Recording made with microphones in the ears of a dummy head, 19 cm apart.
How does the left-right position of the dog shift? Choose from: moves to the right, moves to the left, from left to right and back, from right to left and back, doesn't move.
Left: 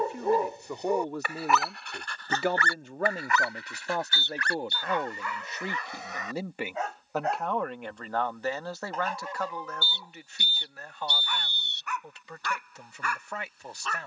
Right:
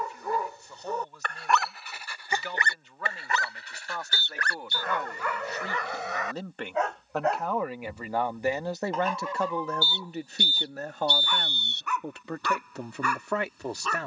moves to the right.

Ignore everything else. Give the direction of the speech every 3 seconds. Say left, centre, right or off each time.
left, left, centre, right, right.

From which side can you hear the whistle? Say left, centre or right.
right.